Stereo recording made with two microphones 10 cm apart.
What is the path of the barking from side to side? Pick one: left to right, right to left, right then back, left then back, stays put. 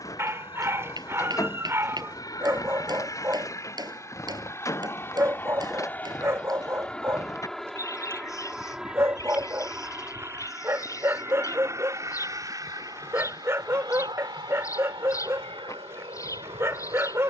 stays put.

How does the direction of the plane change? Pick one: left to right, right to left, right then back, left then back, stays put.
left to right.